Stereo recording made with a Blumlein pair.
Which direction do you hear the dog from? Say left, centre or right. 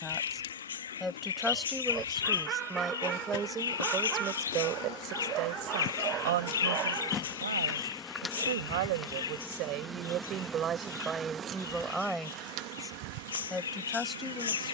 right.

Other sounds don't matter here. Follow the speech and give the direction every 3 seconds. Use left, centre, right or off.
centre, right, right, right, centre.